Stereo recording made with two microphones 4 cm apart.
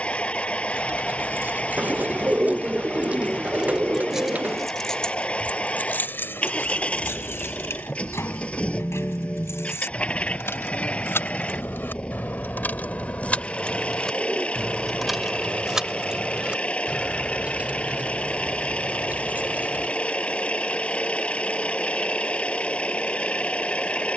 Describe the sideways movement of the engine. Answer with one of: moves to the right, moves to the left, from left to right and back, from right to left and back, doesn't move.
doesn't move.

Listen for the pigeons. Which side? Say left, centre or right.
right.